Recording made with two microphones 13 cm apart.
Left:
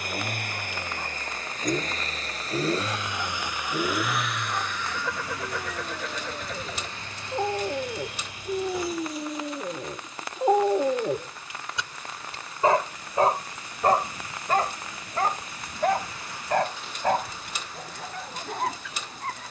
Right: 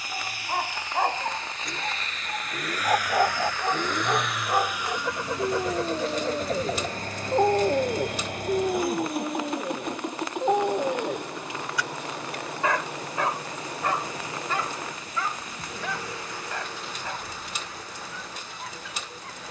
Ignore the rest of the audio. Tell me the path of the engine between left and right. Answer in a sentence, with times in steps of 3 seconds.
In this clip you hear the engine on the left from 0 s, in the centre from 3 s and on the right from 6 s.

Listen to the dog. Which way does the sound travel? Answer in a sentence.
In this clip you hear the dog move to the left.